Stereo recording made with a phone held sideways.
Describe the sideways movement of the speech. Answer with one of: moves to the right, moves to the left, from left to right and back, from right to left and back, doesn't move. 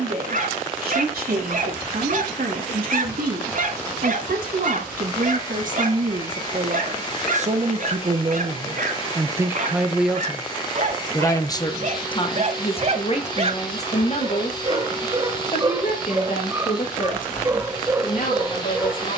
moves to the left.